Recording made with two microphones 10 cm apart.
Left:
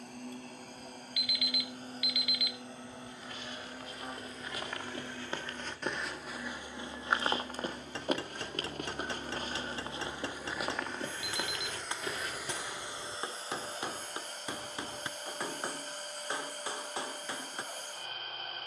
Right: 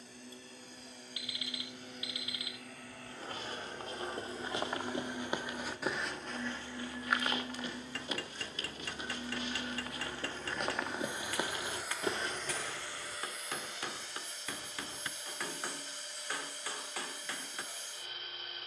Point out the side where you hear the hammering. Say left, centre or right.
left.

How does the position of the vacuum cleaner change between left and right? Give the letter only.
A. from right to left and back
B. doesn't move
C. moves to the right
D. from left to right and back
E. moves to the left
D.